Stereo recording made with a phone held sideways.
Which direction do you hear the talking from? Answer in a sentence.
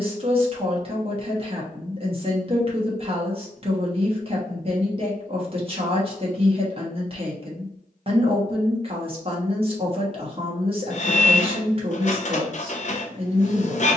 You can hear the talking on the right.